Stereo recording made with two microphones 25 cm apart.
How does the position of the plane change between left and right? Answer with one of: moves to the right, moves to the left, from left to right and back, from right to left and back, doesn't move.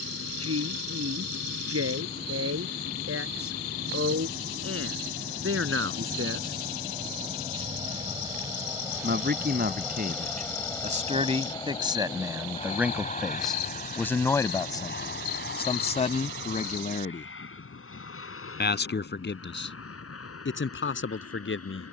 moves to the left.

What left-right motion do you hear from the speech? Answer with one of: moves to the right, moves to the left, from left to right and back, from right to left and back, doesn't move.
moves to the left.